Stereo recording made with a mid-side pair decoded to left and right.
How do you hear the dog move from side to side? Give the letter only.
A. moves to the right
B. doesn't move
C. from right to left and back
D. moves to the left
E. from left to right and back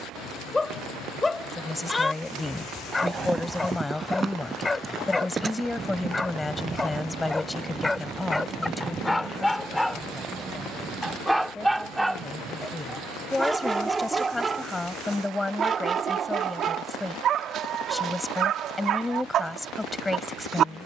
A.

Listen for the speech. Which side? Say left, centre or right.
centre.